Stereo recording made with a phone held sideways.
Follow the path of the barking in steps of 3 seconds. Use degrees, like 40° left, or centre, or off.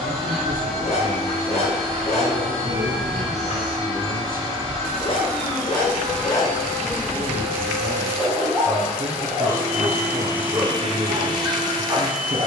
50° left, 40° left, 10° left, 20° right.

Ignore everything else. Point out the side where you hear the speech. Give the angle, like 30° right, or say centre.
70° right.